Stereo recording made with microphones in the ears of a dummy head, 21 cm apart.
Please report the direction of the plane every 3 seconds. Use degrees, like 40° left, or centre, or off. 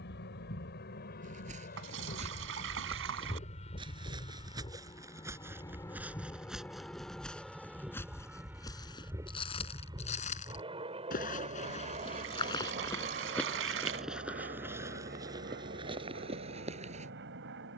40° left, 20° left, centre, 20° right, 30° right, 40° right.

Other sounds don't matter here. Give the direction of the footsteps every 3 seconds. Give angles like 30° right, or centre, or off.
30° right, 20° right, 10° left, 30° left, 10° left, 20° right.